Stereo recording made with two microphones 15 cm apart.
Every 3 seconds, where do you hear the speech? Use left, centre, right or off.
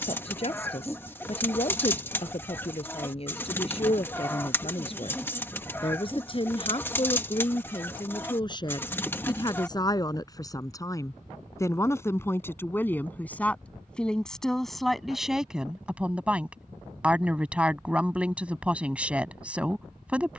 left, left, left, left, centre, centre, centre.